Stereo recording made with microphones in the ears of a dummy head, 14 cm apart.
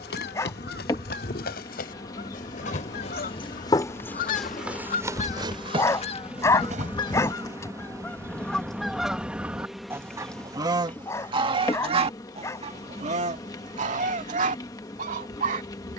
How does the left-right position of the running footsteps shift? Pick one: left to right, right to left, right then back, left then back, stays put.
left to right.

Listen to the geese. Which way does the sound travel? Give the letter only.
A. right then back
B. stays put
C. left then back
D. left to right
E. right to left
D.